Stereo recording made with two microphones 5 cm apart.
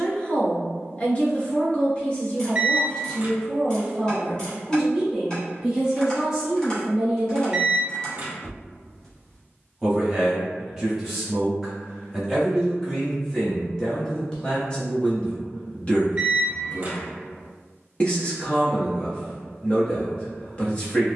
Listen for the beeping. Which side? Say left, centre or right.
right.